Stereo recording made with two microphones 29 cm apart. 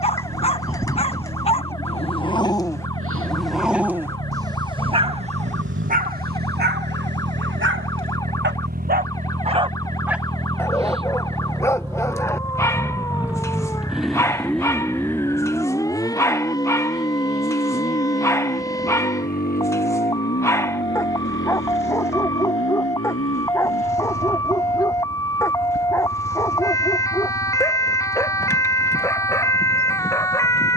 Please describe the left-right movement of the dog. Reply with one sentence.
You can hear the dog go right and come back.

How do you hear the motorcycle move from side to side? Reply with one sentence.
You can hear the motorcycle travel towards the left.